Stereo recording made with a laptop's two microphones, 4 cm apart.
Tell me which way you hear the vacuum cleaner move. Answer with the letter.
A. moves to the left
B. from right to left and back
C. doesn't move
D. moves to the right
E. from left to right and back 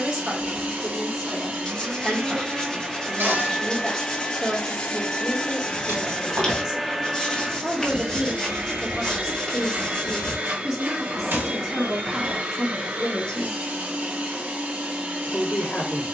B.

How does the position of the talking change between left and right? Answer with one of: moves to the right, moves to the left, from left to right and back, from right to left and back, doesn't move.
moves to the left.